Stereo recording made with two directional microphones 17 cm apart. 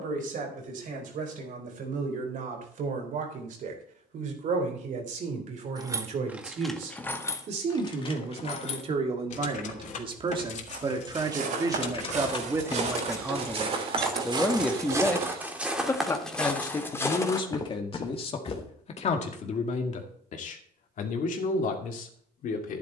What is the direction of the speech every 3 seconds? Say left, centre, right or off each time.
right, right, right, right, centre, left, left, left.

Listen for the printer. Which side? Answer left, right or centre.
right.